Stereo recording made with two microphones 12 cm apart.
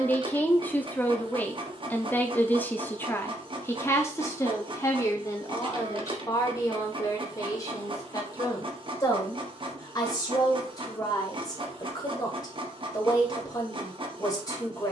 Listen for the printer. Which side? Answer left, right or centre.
right.